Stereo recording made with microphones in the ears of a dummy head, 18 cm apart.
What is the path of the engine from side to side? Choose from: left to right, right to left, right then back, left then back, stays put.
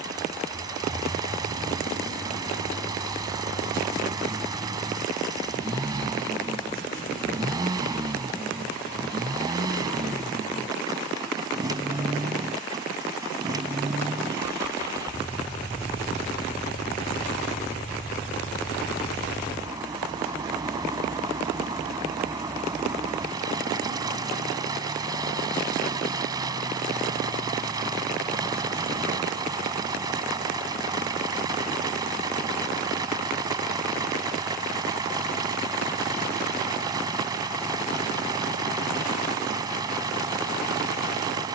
stays put.